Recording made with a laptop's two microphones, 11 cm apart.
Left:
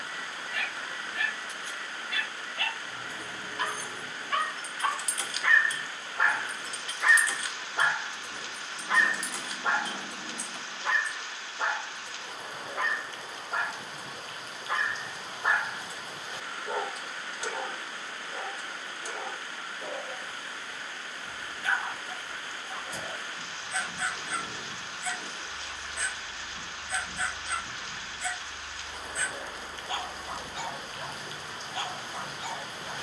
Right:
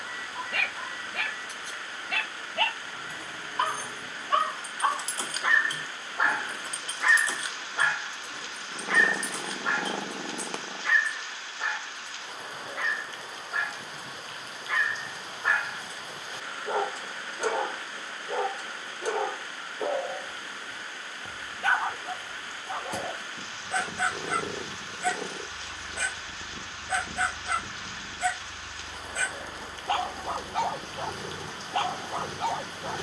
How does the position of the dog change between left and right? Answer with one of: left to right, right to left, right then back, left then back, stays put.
left then back.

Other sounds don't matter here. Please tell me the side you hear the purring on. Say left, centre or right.
right.